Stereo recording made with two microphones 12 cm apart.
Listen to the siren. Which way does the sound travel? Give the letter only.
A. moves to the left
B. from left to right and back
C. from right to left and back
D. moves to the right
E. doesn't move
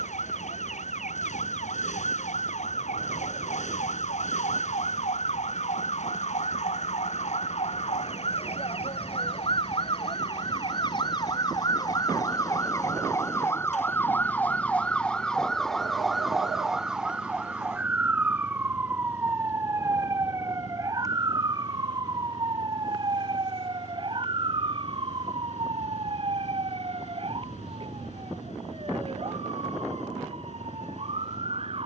D.